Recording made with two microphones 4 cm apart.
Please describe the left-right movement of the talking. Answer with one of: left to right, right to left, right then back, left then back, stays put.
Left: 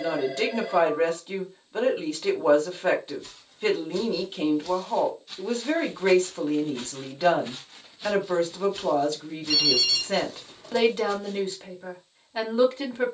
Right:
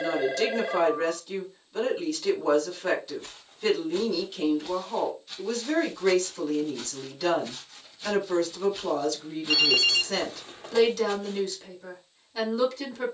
stays put.